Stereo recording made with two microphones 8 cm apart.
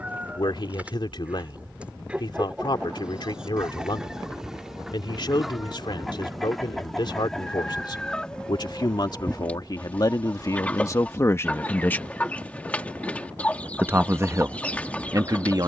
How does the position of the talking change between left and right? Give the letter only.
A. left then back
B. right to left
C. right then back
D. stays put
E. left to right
E.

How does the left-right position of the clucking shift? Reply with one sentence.
You can hear the clucking go from the right side to the left.